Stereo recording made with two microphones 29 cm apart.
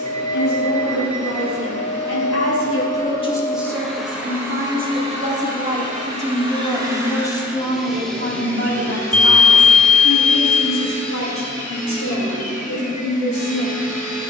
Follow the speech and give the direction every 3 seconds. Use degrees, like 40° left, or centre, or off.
70° left, 20° right, 20° left, 60° left, 80° left.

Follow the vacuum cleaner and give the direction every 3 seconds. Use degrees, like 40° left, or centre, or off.
20° left, 10° right, 10° right, 20° left, 30° left.